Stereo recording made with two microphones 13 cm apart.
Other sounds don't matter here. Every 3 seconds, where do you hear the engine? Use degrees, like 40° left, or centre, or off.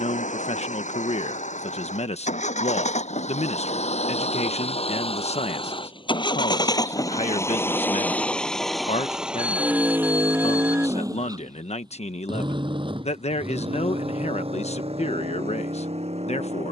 70° left, 50° left, 20° left, 20° right, 50° right, 50° right.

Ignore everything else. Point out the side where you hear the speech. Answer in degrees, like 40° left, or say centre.
60° left.